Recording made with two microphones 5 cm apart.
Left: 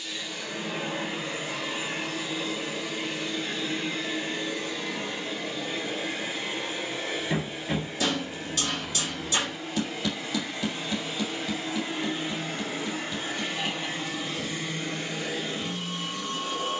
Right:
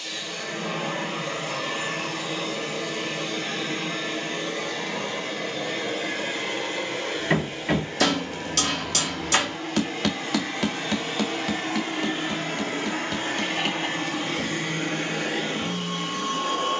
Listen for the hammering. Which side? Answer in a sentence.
In this clip you hear the hammering on the right.